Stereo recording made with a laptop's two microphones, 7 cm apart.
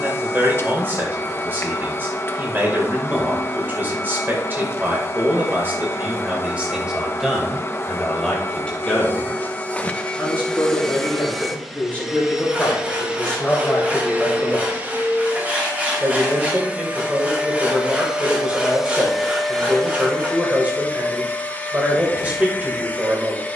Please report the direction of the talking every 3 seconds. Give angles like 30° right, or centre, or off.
30° right, 30° right, centre, 20° left, 10° left, 20° right, 20° right, 20° right.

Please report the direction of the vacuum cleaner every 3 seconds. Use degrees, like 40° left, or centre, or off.
30° left, 30° left, 30° left, 10° left, 20° right, 20° right, centre, 20° left.